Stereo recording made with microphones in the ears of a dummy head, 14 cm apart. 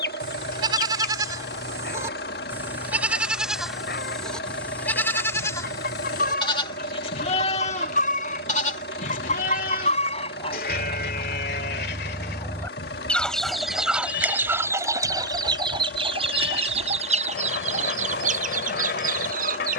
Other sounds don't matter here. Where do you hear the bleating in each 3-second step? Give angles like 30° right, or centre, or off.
20° right, 10° left, 40° left, 60° left, 70° left, 70° left, 70° left.